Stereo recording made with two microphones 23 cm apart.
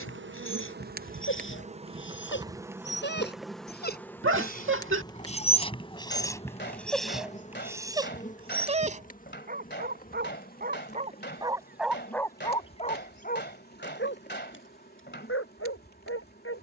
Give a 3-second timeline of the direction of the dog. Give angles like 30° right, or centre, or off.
60° left, 30° left, 10° right, 30° right, 30° left, 60° left.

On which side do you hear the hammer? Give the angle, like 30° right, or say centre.
50° left.